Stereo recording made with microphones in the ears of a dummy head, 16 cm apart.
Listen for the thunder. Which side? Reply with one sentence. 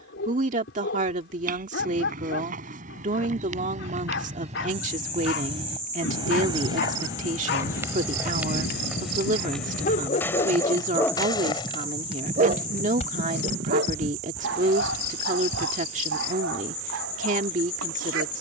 You can hear the thunder on the left.